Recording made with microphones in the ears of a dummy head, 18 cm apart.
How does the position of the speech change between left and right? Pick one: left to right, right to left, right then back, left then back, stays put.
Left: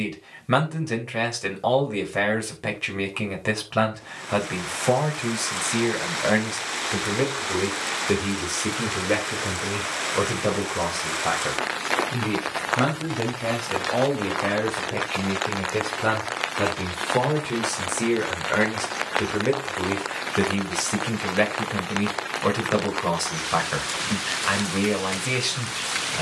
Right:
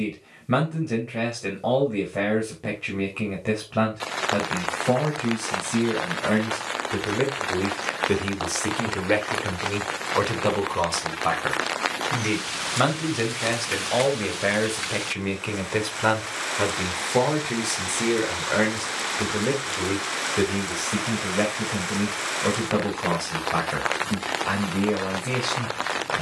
right then back.